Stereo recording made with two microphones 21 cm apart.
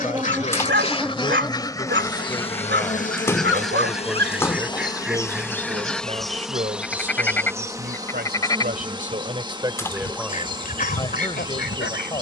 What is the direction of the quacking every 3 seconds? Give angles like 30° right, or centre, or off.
20° left, centre, 10° left, 50° left.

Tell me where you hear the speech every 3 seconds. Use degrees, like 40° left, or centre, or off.
20° left, 10° right, 50° right, centre.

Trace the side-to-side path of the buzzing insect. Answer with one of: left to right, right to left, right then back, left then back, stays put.
left then back.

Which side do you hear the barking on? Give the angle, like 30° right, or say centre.
70° right.